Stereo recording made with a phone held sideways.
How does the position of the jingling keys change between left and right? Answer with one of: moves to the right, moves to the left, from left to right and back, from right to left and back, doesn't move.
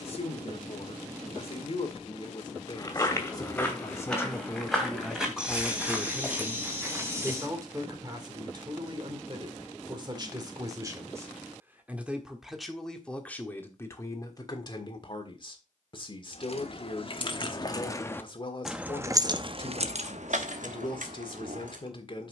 moves to the right.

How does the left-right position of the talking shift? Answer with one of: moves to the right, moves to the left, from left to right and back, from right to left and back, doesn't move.
from left to right and back.